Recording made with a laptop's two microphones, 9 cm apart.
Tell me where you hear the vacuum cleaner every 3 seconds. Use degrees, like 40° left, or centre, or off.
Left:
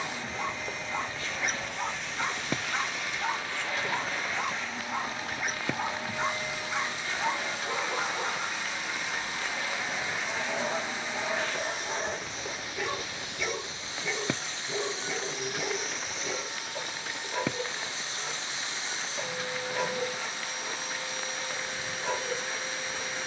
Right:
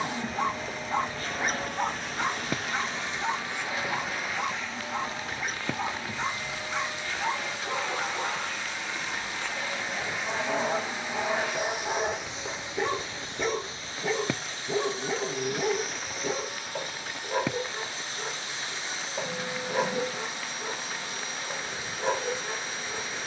50° right, centre, 20° left, centre, 30° right, 50° right, 50° right, 50° right.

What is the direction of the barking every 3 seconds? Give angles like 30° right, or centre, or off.
30° right, 10° left, centre, 40° right, 40° right, 40° right, 40° right, 40° right.